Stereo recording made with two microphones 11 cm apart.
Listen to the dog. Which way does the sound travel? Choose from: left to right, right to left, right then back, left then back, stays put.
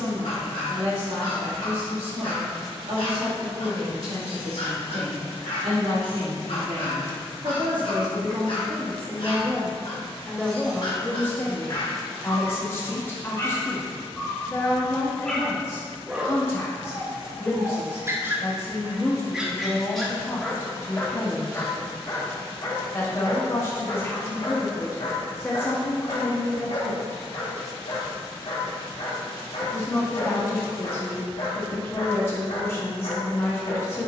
right then back.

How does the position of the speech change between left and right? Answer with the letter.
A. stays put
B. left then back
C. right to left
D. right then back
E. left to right
C.